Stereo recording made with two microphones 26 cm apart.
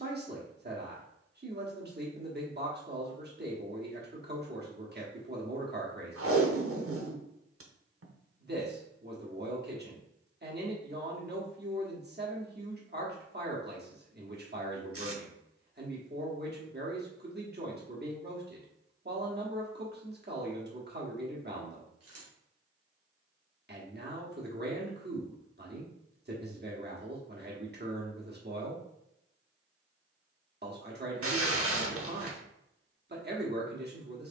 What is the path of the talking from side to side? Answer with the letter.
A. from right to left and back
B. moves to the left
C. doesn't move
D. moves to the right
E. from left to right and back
C.